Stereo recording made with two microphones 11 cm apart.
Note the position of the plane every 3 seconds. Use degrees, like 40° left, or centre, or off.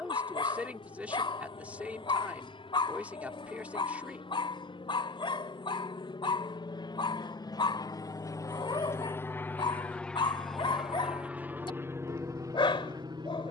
60° left, 60° left, 40° left, centre, 30° right.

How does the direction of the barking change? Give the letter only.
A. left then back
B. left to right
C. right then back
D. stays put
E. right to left
D.